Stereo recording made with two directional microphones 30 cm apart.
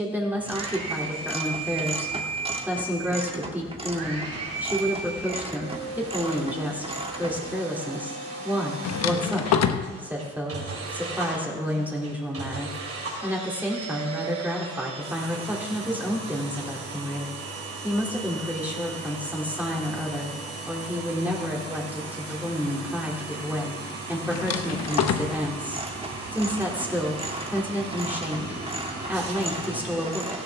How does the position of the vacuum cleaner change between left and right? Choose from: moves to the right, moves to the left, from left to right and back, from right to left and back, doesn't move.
doesn't move.